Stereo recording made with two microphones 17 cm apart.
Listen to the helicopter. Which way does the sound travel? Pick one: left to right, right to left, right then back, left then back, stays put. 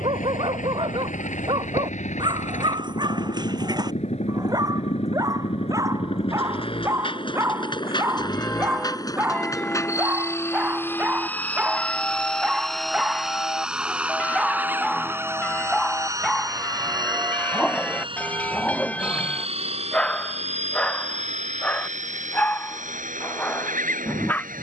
left to right.